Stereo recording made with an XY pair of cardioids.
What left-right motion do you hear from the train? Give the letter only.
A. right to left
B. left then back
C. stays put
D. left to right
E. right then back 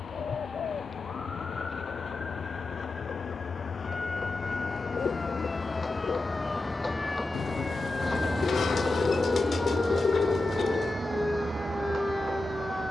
D.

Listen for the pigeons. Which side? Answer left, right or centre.
left.